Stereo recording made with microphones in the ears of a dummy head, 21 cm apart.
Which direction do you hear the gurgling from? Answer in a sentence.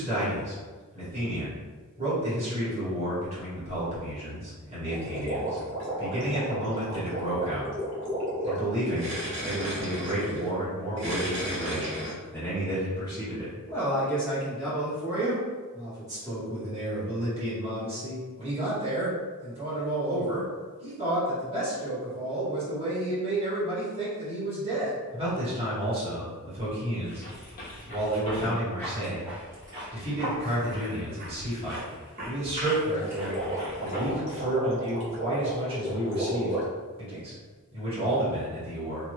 In this clip you hear the gurgling on the right.